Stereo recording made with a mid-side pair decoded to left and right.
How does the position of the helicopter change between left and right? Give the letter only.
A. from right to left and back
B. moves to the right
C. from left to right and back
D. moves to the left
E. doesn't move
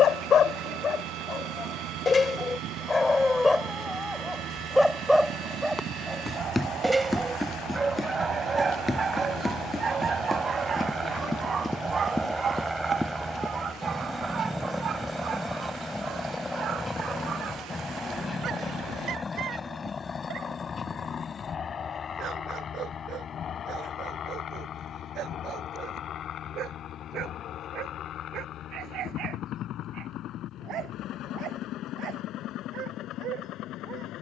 D.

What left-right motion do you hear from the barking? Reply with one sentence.
In this clip you hear the barking travel towards the right.